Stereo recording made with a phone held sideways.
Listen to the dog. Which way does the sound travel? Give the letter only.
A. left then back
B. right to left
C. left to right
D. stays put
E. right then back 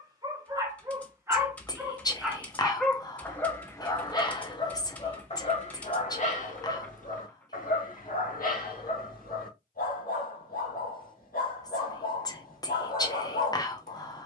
B.